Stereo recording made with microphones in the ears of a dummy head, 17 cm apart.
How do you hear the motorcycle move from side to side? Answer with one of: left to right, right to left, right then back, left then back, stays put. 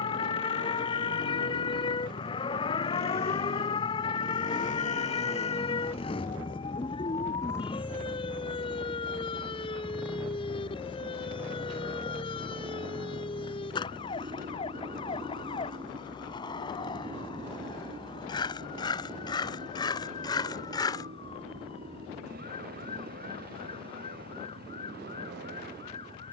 left to right.